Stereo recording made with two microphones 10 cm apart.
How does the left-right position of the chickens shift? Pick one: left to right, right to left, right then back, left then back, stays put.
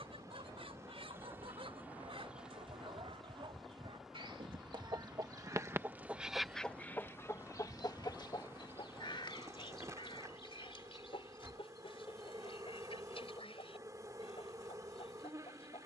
right to left.